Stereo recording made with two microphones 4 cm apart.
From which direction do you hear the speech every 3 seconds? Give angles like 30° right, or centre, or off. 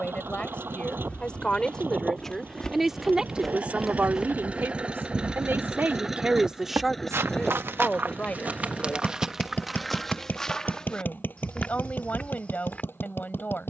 20° left, 40° right, 10° left, 40° left, 40° left.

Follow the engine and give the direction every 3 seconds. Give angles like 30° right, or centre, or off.
50° right, 30° right, 10° left, 40° left, 50° left.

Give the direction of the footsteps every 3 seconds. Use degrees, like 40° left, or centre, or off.
20° left, 20° right, 50° right, 10° left, 30° left.